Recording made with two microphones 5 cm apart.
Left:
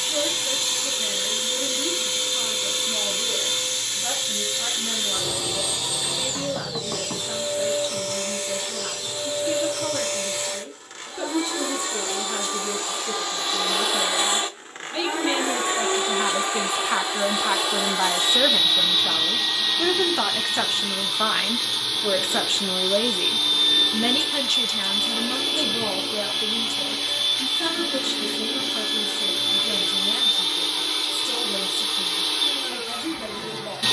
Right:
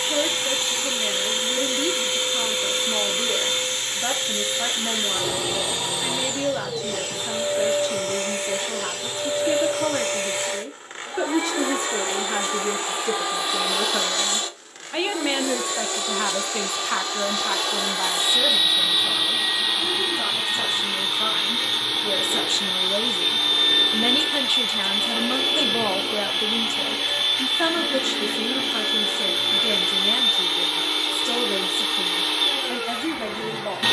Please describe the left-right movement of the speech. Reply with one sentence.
You can hear the speech move from right to left and back again.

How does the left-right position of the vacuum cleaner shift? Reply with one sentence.
In this clip you hear the vacuum cleaner move from right to left and back again.